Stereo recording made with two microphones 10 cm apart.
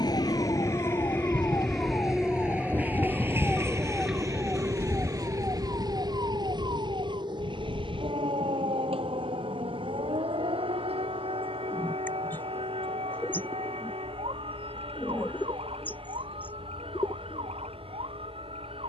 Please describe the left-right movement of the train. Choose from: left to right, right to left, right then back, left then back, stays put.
left to right.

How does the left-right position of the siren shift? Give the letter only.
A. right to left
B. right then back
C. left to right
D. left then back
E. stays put
C.